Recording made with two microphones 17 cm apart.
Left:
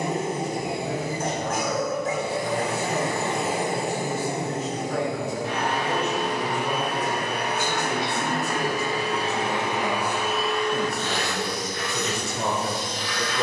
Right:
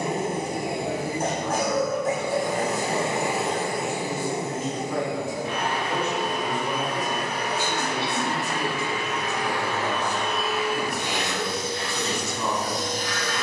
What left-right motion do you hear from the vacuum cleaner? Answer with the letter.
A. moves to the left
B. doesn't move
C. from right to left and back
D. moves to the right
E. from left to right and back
C.